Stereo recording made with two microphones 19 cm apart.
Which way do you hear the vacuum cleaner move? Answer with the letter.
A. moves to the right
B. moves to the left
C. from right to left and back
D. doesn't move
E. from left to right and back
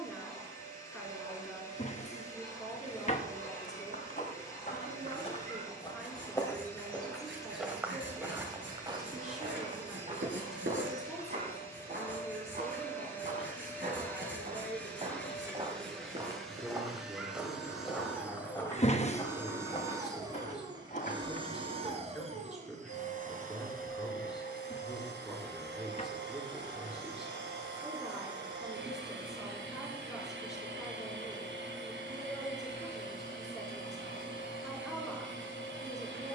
A.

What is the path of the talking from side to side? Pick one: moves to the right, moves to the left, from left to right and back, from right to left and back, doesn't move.
doesn't move.